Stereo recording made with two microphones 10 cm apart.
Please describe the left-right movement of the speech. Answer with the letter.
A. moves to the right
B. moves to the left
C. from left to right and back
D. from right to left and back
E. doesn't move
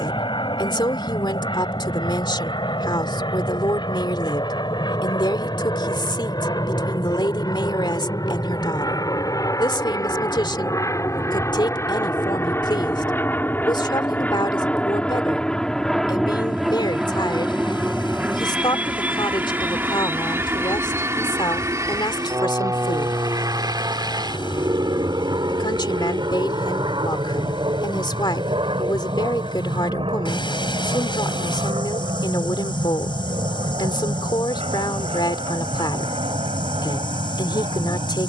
E.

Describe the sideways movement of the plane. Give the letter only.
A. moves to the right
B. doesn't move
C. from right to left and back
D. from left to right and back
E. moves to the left
A.